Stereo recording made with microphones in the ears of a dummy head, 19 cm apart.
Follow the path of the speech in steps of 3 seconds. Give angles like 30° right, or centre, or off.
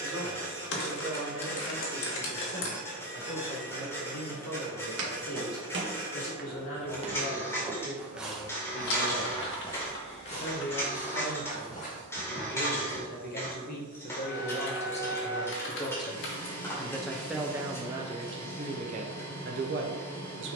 70° left, 70° left, 60° left, 60° left, 40° left, 10° left, 40° right.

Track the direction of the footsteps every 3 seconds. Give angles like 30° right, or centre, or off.
off, 60° right, 20° right, 30° left, 50° left, off, off.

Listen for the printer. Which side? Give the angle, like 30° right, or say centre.
10° left.